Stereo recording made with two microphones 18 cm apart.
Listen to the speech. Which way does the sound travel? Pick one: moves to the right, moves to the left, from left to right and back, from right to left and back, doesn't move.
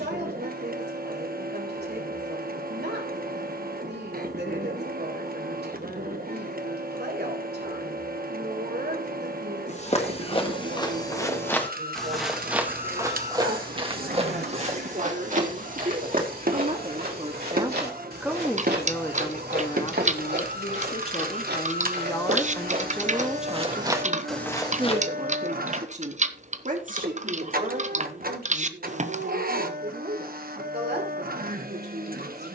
from right to left and back.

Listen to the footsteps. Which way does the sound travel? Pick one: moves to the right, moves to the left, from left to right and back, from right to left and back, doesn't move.
from left to right and back.